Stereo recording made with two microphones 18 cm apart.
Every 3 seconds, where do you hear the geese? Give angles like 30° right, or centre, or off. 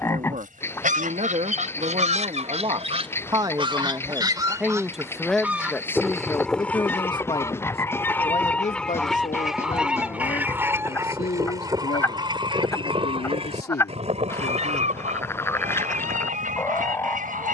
40° right, 20° right, 10° left, 10° right, 30° right, 50° right.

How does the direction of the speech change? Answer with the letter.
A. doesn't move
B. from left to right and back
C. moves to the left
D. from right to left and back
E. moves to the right
C.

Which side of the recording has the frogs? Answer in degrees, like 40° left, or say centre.
10° left.